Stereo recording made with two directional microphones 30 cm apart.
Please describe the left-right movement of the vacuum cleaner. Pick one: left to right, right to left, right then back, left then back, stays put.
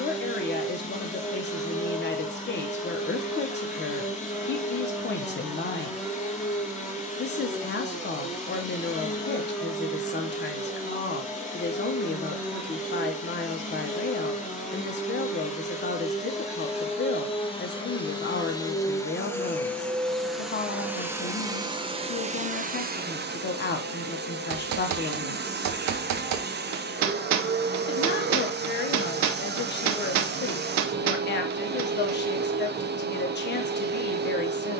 left to right.